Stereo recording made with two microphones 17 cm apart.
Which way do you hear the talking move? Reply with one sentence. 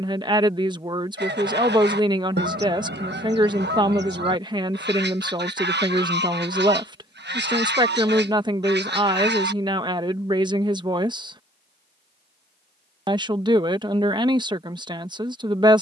You can hear the talking stay put.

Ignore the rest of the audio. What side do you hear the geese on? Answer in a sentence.
You can hear the geese on the right.